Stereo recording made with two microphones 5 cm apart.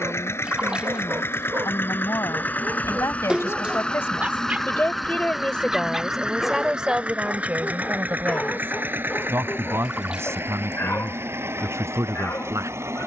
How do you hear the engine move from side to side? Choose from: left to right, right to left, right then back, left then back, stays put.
left to right.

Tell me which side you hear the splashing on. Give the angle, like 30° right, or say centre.
20° right.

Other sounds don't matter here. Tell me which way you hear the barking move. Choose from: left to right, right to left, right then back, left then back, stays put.
right to left.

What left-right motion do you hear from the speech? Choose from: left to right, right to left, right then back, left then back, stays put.
left to right.